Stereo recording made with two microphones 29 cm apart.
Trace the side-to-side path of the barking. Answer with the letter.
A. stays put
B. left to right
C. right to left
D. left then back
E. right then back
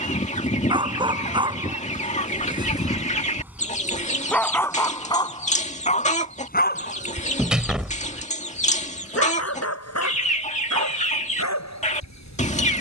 C.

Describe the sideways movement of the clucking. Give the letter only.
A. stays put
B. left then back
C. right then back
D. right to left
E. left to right
A.